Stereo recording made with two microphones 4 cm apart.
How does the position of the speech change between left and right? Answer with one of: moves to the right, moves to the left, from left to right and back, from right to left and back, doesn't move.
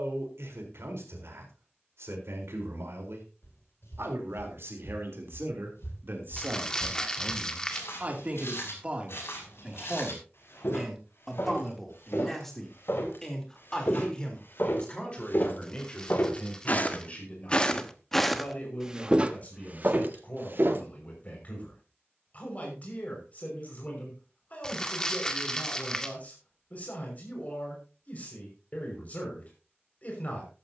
moves to the left.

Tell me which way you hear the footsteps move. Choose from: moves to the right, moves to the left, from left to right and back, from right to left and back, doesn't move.
moves to the right.